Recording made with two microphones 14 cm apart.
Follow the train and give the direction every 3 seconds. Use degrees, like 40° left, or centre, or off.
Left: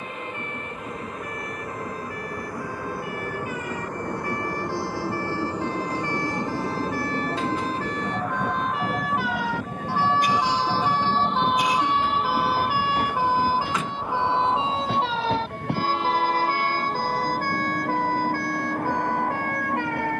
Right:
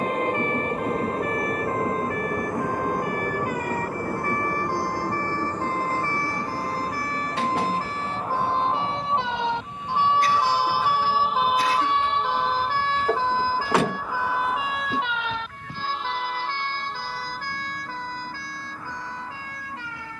30° right, centre, 30° left, 50° left, 60° left, 70° left, 70° left.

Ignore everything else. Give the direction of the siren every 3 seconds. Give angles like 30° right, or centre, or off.
60° right, 50° right, 40° right, 10° right, 20° left, 40° left, 60° left.